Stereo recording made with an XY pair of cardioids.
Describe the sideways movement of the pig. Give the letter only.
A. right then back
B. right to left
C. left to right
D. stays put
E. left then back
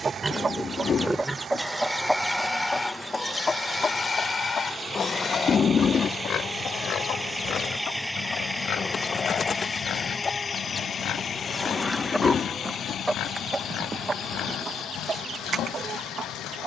B.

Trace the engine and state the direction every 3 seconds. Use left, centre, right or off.
right, right, centre, left, left, left.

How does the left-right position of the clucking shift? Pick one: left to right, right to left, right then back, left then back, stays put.
left then back.